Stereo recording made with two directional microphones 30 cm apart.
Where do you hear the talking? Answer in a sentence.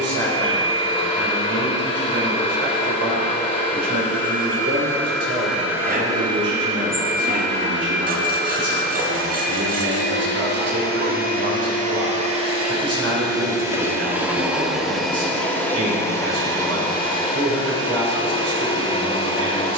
You can hear the talking on the right.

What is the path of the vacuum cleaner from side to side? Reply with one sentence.
You can hear the vacuum cleaner move from left to right and back again.